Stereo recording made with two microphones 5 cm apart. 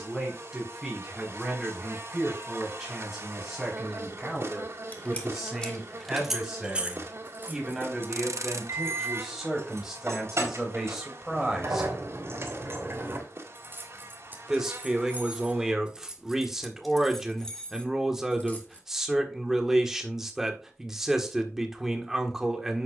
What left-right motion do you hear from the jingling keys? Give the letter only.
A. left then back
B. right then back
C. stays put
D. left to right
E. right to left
B.